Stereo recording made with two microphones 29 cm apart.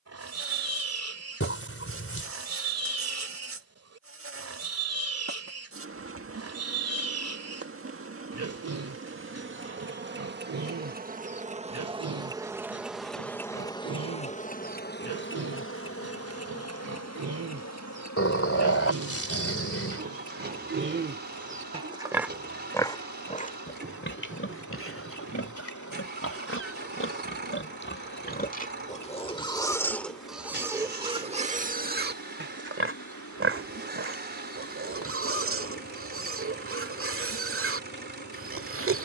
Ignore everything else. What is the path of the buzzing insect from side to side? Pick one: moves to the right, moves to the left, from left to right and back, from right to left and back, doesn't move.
moves to the left.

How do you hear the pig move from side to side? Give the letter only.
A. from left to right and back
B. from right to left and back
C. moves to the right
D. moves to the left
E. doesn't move
B.